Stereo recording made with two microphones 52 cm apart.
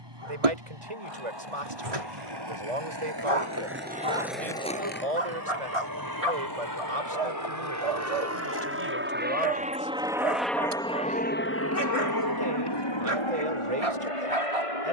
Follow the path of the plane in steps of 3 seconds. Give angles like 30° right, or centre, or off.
50° right, 50° right, 30° right, centre, 50° left.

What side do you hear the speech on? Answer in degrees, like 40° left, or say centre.
90° right.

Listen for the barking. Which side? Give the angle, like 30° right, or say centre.
80° right.